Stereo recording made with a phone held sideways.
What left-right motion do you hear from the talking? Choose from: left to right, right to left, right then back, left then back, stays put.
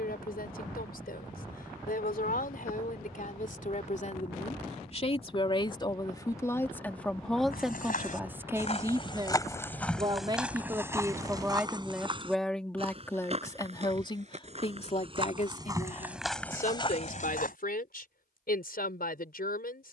right then back.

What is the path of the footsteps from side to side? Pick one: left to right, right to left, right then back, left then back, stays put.
right then back.